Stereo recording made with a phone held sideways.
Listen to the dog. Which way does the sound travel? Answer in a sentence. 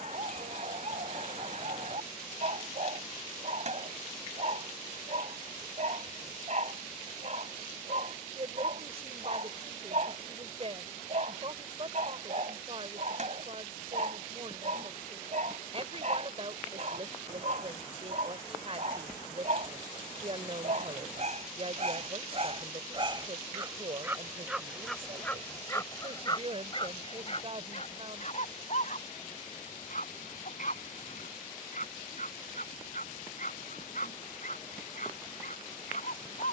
In this clip you hear the dog go from the right side to the left.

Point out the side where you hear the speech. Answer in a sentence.
You can hear the speech on the right.